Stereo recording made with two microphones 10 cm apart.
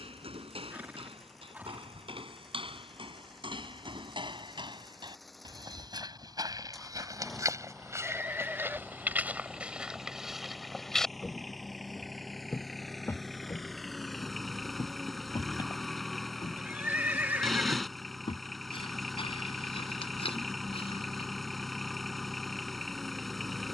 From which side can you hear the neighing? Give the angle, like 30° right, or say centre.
20° right.